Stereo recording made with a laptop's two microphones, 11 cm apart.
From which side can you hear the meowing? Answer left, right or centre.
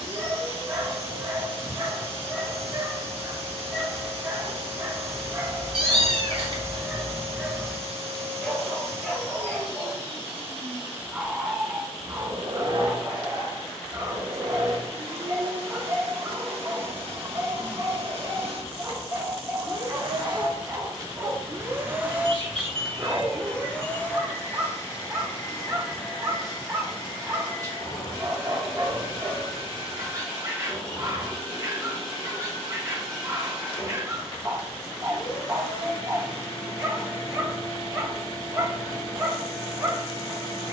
right.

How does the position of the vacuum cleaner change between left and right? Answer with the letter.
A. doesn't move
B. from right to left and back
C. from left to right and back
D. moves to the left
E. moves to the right
D.